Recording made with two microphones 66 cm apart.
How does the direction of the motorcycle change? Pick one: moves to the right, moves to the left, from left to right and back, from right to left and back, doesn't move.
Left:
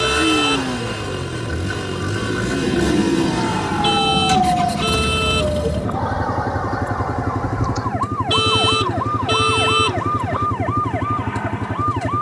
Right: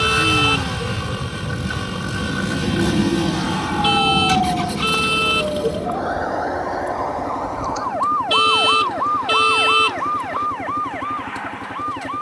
doesn't move.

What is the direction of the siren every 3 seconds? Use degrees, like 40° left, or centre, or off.
30° right, 10° left, 40° left, 60° left.